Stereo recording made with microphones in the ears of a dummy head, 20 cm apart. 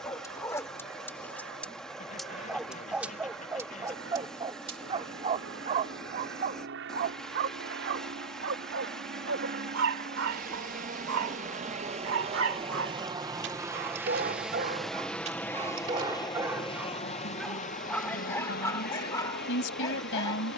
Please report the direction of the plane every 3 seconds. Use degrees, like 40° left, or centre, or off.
70° right, 60° right, 60° right, 40° right, 20° right, 20° left, 50° left.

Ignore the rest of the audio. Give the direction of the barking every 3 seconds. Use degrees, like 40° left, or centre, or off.
10° left, 20° right, 50° right, 70° right, 50° right, 10° right, 10° left.